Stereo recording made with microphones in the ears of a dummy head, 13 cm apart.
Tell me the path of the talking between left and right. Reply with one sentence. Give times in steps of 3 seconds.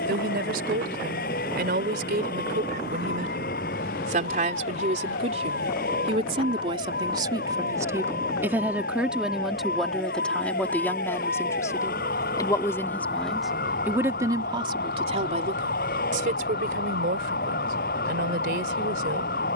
You can hear the talking on the right from 0 s, in the centre from 9 s and on the right from 15 s.